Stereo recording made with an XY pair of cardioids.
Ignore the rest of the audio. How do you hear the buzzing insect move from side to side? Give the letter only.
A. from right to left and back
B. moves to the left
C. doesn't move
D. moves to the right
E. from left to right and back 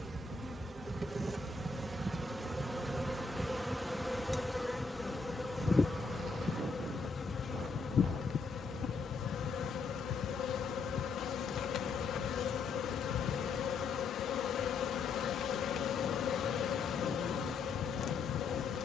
B.